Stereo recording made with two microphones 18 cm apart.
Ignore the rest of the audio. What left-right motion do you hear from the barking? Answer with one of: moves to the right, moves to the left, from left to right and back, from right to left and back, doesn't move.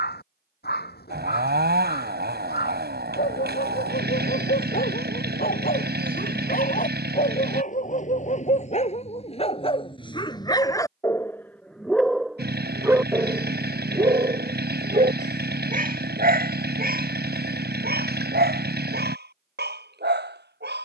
moves to the right.